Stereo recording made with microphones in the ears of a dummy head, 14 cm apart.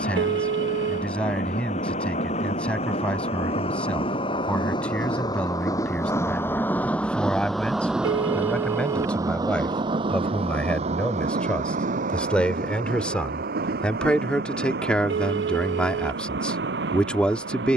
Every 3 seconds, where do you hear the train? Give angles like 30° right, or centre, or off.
50° left, 30° left, centre, 40° right, 60° right, 70° right.